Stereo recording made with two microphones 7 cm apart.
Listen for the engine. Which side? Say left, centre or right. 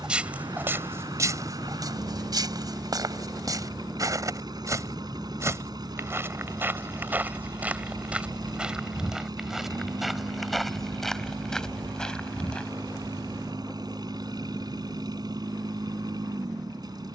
right.